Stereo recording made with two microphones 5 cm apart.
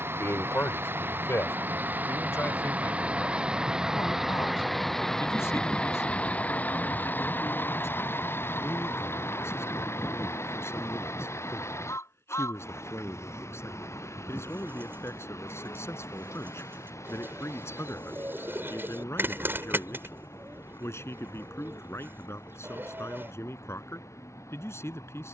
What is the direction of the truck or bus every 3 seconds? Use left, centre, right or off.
right, centre, left, left, left, left, left, left, left.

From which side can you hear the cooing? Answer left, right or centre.
right.